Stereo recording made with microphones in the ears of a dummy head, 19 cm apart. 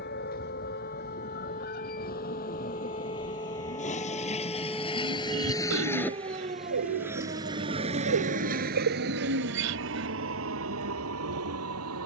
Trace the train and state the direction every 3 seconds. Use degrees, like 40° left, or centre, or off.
50° left, 30° left, 20° right, 70° right.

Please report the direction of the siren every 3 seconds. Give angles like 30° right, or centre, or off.
40° left, centre, 50° right, 70° right.